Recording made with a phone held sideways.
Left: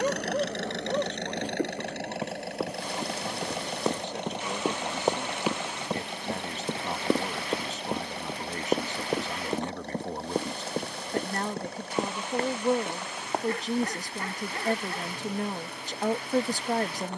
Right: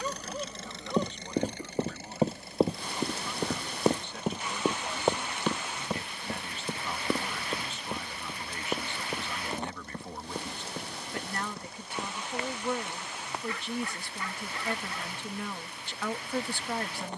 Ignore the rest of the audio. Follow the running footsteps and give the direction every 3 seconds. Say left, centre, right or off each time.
right, centre, left, left, left, off.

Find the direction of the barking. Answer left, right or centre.
left.